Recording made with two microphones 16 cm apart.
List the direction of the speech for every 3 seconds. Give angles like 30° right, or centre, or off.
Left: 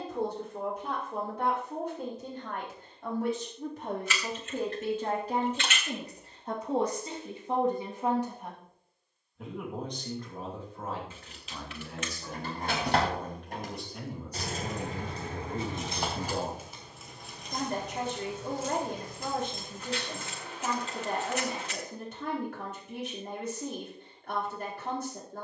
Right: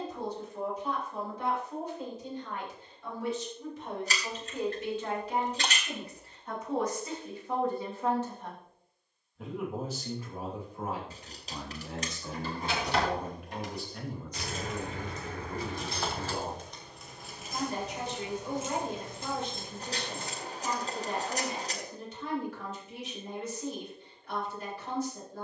70° left, 50° left, 30° left, 10° right, 10° right, 50° left, 60° left, 60° left, 60° left.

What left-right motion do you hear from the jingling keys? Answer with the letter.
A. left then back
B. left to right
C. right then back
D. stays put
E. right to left
B.